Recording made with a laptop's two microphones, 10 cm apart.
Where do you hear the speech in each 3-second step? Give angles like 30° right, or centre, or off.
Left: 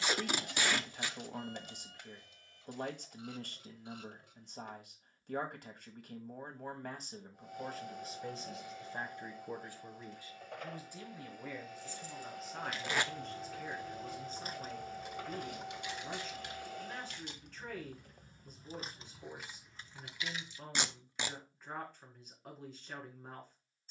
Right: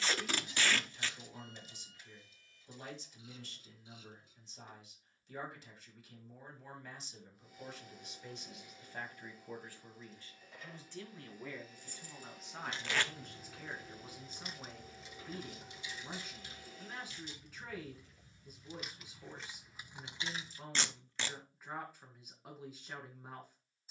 60° left, 60° left, 50° left, 10° left, centre, 10° right, 10° right, 10° right.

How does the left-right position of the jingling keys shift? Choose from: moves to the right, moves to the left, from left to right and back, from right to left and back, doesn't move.
from right to left and back.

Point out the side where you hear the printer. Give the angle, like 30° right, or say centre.
70° left.